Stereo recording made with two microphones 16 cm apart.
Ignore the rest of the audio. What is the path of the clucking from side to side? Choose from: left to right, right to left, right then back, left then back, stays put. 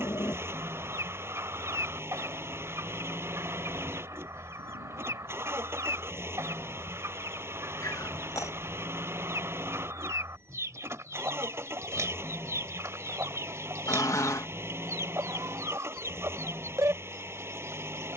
stays put.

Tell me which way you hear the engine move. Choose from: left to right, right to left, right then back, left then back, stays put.
stays put.